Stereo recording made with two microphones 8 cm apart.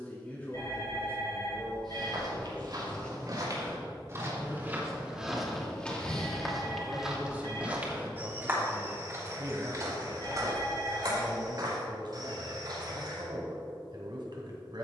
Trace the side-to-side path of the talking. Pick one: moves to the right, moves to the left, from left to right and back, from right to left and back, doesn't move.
moves to the right.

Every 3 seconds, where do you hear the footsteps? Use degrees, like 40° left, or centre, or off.
60° right, 20° right, 10° right, 50° right, 60° right.